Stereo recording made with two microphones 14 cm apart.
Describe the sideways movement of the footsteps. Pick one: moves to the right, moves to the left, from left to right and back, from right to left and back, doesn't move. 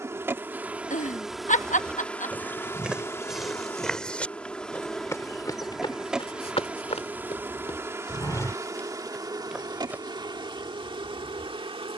from right to left and back.